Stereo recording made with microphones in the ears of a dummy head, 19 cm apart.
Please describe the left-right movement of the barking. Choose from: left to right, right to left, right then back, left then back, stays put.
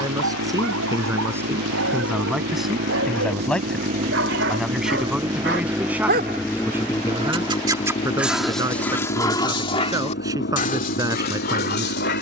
right to left.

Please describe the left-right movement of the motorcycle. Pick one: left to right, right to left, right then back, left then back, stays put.
right to left.